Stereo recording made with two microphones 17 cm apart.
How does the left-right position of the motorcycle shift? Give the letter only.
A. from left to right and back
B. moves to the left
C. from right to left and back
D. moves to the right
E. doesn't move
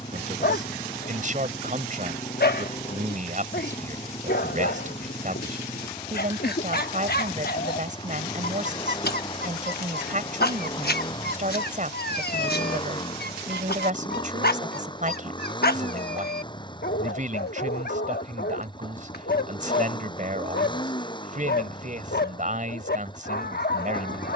E.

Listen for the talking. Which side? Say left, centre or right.
right.